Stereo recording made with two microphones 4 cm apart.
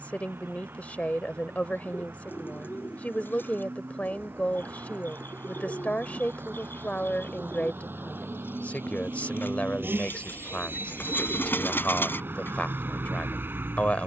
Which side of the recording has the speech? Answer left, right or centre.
left.